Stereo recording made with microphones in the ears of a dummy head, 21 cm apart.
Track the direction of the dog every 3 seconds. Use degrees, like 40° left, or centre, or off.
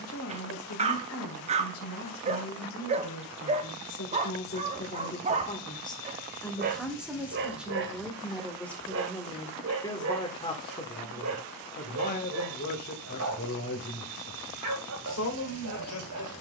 30° right, 30° right, 40° right, 60° right, 70° right, 70° right.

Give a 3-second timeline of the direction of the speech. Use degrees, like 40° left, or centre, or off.
70° left, 40° left, centre, 20° left, 50° left, 60° left.